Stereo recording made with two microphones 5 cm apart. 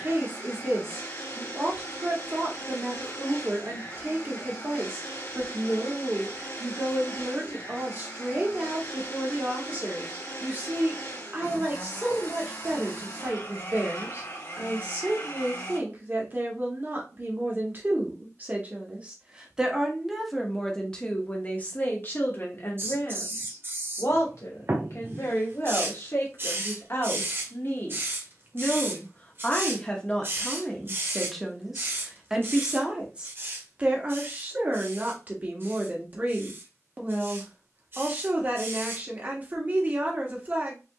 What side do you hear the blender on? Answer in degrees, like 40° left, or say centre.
80° left.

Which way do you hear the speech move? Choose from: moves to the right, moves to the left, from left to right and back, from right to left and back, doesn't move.
from right to left and back.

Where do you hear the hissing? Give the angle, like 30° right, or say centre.
40° right.